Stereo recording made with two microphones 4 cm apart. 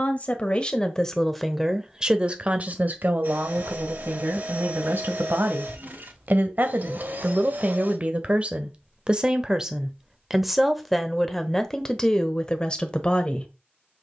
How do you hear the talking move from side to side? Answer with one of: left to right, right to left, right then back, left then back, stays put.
right then back.